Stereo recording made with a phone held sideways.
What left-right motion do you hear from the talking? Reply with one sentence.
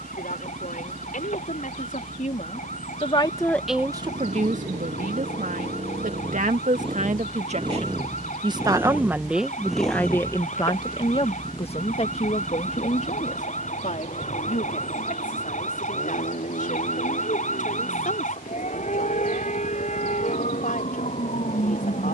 In this clip you hear the talking move from left to right and back again.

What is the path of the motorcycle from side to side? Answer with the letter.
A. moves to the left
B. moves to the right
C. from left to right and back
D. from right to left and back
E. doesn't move
A.